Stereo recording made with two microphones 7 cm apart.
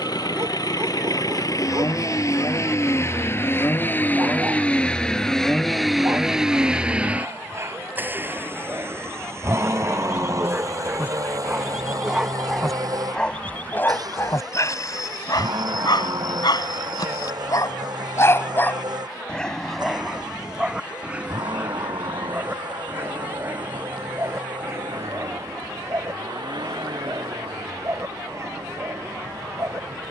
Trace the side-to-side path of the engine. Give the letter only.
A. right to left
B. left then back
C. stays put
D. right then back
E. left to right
E.